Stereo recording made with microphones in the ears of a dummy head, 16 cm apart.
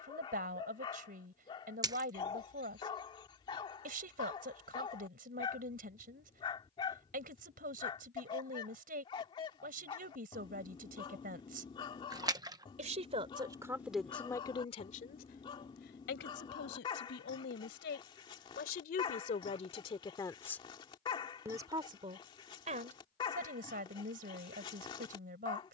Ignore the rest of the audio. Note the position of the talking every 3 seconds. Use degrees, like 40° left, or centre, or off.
50° right, 50° right, 50° right, 50° right, centre, 60° left, 40° left, 40° right, 50° right.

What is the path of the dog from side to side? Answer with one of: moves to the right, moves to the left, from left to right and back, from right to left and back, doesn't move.
doesn't move.